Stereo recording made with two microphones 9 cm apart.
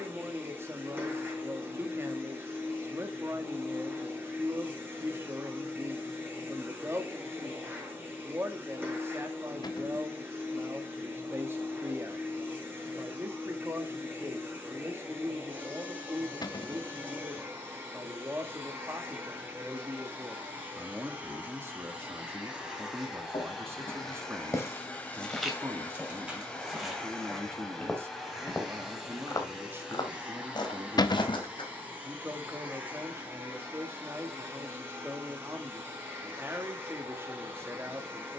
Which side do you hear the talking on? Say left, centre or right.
right.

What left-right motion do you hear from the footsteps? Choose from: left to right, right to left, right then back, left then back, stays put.
right then back.